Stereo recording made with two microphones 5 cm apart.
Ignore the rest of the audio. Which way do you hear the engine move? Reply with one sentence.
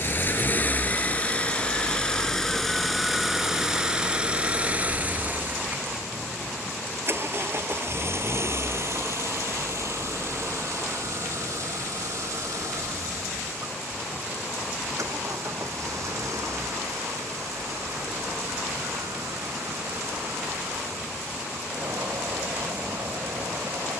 You can hear the engine move to the right.